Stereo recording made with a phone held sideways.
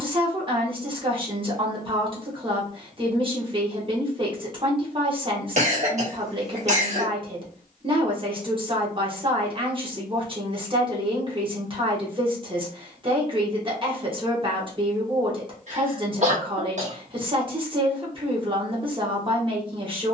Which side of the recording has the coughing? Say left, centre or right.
right.